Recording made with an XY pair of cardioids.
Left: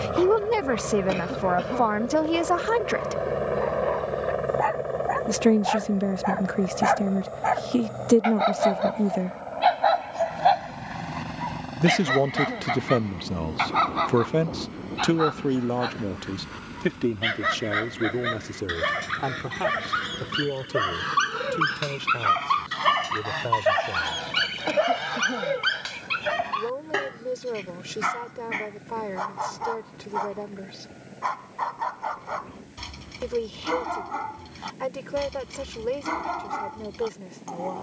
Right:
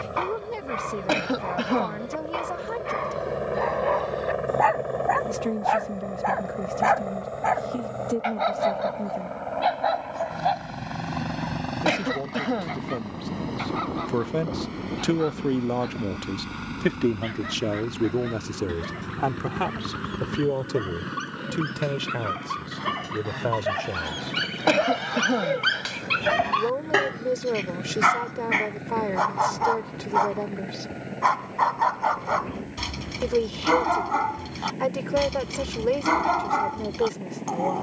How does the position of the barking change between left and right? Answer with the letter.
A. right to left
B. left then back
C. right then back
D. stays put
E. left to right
B.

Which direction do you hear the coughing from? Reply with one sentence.
You can hear the coughing on the right.